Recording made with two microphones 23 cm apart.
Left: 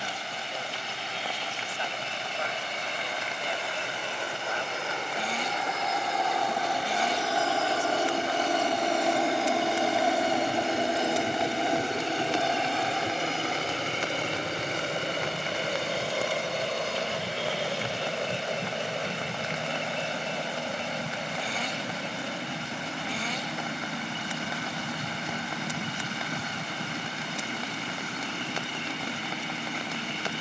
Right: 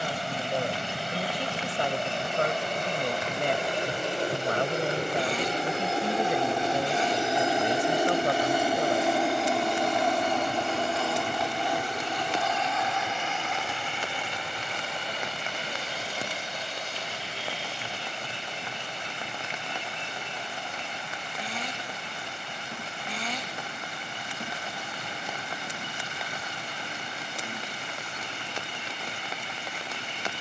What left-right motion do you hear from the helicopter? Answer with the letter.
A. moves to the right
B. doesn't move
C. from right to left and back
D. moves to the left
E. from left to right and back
D.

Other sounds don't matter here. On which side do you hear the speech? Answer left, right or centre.
right.